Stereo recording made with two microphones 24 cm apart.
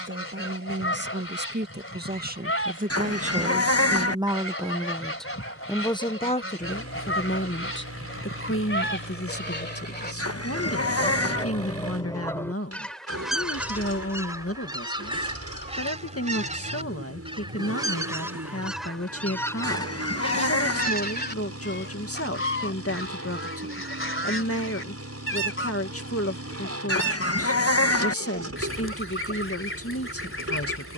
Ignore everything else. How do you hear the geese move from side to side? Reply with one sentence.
In this clip you hear the geese go right and come back.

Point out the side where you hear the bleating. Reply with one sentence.
In this clip you hear the bleating on the left.